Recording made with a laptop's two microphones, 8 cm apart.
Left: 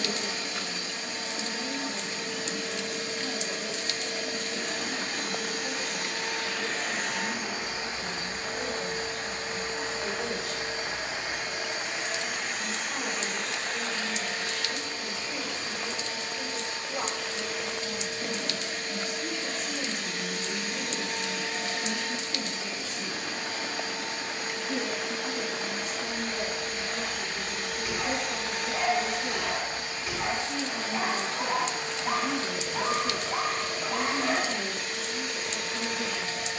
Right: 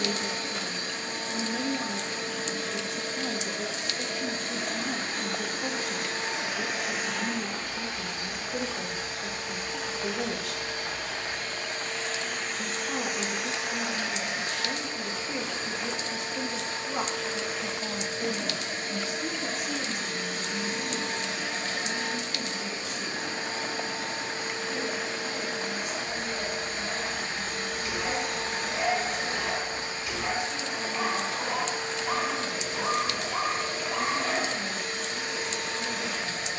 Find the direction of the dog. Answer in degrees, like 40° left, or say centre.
30° left.